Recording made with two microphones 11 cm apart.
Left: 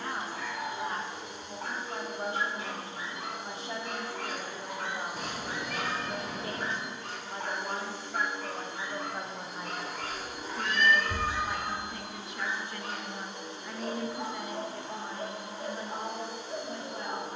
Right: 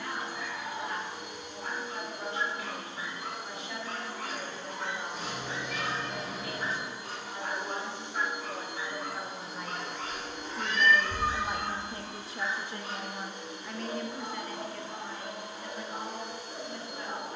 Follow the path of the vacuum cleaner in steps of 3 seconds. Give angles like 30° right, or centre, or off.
30° left, 20° left, 10° right, 10° left, 30° left, 30° left.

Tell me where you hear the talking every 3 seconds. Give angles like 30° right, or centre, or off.
40° left, 40° left, 30° left, centre, 10° right, 30° left.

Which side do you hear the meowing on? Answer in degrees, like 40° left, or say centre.
60° left.